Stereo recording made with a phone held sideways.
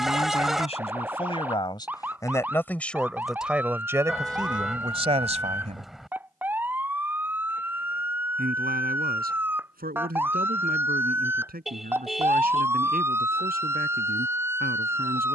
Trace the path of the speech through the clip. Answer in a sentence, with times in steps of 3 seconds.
You can hear the speech on the left from 0 s and on the right from 3 s.